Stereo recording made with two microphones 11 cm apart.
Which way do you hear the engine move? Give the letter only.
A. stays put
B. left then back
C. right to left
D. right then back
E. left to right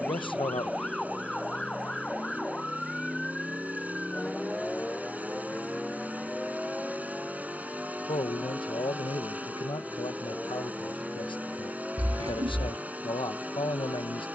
A.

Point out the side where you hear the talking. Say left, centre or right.
left.